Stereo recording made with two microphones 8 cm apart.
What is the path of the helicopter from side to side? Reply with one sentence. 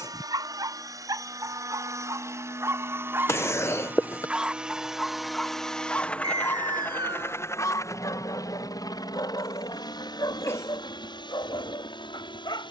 You can hear the helicopter travel towards the left.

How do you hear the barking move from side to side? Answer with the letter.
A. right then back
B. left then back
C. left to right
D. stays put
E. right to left
E.